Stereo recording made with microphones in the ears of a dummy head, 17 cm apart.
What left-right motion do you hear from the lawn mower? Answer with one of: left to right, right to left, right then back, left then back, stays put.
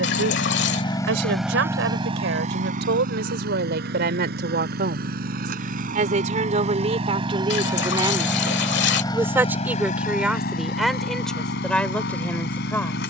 right then back.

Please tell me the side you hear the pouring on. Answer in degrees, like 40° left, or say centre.
70° left.